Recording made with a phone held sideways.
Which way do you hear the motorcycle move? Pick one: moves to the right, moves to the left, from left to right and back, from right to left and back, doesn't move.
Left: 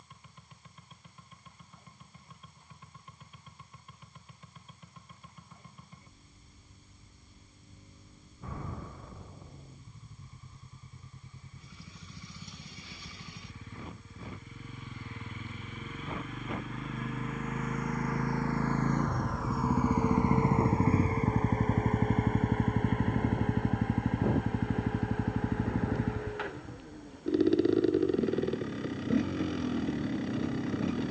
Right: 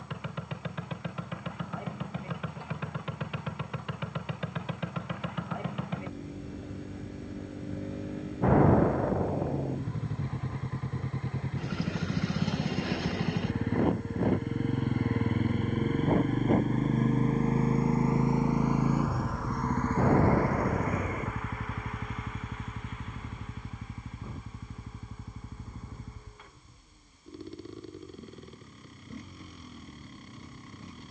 moves to the left.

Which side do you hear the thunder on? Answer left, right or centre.
right.